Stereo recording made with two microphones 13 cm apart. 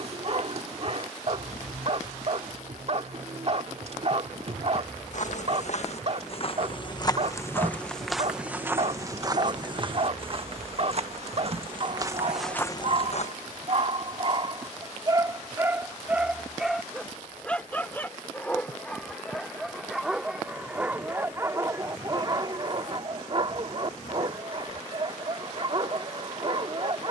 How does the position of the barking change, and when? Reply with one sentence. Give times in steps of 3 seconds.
You can hear the barking on the right from 0 s, in the centre from 15 s and on the right from 21 s.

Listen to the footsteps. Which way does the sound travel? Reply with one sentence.
In this clip you hear the footsteps move from left to right and back again.